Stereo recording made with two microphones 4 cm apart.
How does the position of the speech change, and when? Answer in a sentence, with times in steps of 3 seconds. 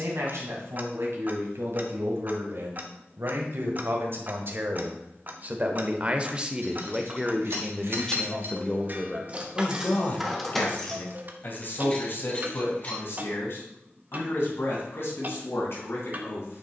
In this clip you hear the speech on the right from 0 s, in the centre from 6 s and on the left from 9 s.